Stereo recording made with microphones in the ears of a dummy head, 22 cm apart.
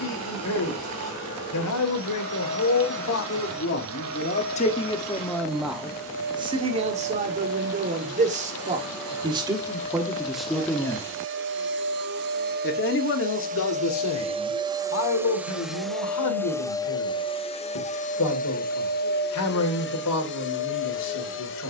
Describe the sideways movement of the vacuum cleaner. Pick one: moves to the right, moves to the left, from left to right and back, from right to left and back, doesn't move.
moves to the left.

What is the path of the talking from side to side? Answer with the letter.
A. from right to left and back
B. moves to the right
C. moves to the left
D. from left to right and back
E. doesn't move
D.